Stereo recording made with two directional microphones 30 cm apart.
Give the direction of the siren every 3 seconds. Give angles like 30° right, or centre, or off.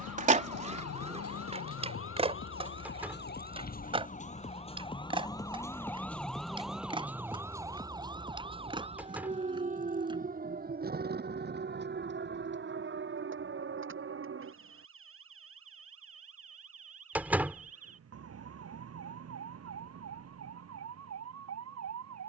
50° left, 20° left, 10° right, 30° right, 40° right, 50° right, 50° right, 50° right.